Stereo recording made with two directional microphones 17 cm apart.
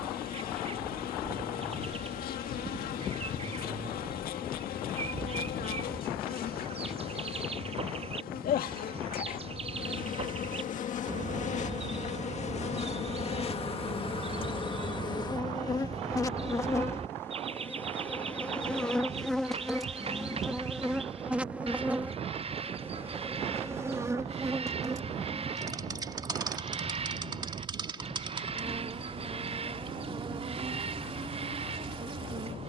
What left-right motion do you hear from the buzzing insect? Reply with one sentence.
You can hear the buzzing insect move to the right.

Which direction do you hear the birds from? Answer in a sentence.
In this clip you hear the birds on the right.